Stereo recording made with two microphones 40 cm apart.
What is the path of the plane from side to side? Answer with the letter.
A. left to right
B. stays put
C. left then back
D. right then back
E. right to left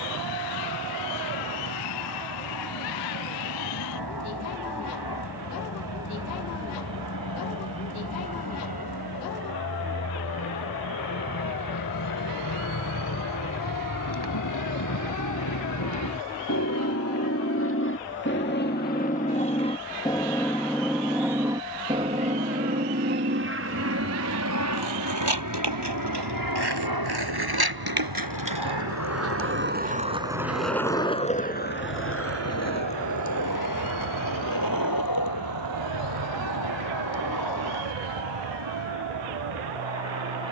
A.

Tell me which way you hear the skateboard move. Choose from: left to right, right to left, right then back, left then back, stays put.
right to left.